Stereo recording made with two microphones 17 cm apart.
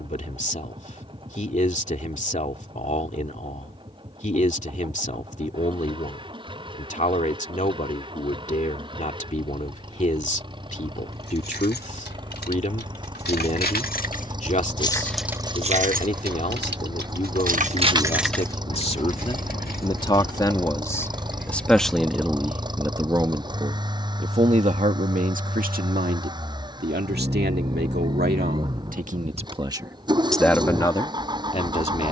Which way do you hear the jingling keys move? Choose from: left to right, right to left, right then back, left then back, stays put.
right then back.